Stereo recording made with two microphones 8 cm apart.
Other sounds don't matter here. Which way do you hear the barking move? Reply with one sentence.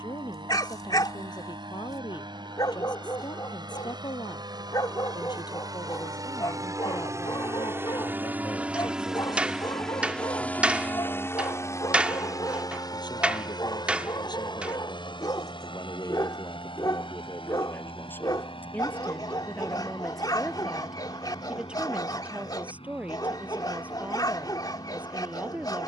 In this clip you hear the barking stay put.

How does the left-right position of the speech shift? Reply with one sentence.
You can hear the speech travel towards the right.